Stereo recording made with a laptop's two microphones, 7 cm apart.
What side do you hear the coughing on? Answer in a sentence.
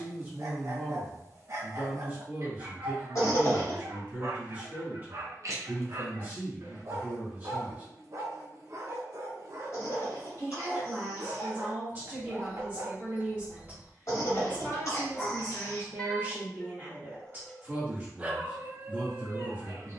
In this clip you hear the coughing on the left.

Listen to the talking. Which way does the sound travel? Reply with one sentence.
You can hear the talking stay in one place.